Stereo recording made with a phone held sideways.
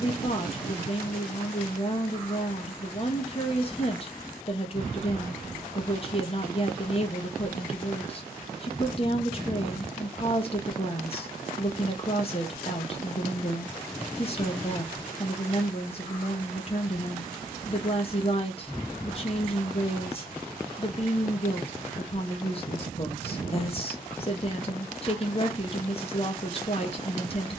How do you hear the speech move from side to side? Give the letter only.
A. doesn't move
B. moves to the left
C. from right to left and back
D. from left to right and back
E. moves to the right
A.